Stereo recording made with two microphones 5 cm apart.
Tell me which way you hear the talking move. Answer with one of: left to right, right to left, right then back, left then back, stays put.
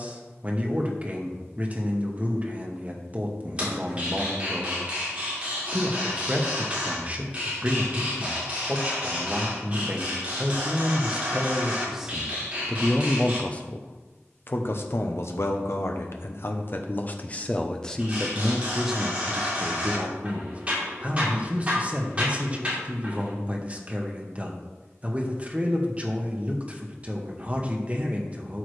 left then back.